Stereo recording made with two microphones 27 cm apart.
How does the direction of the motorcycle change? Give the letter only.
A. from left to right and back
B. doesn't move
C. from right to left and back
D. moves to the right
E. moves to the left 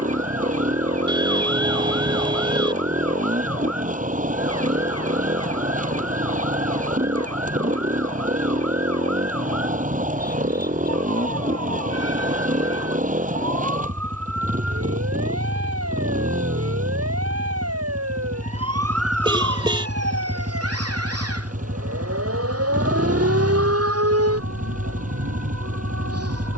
B.